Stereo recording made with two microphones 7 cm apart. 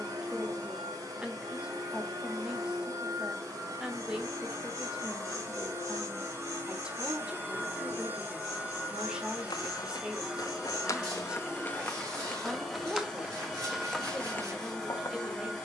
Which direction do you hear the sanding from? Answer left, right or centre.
right.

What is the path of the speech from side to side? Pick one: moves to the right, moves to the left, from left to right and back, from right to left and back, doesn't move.
doesn't move.